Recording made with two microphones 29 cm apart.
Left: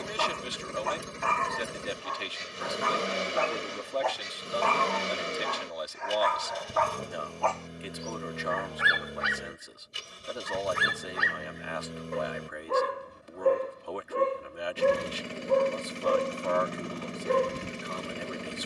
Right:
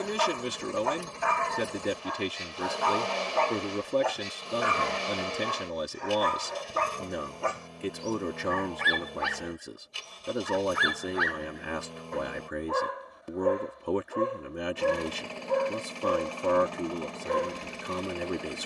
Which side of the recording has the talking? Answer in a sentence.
In this clip you hear the talking on the right.